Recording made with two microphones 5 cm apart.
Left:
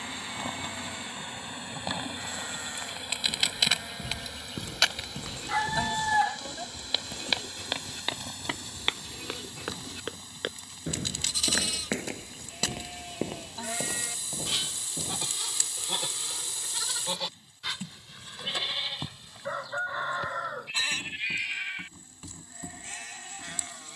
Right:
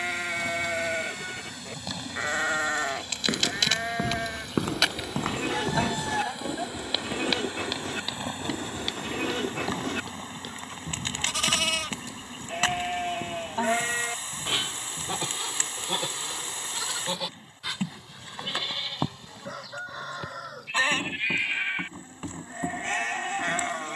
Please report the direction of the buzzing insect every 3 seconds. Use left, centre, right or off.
left, centre, right, right, right, right, right, right.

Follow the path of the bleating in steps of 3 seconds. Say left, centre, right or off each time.
right, right, right, right, right, centre, centre, right.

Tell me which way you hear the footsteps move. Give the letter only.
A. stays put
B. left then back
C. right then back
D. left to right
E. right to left
E.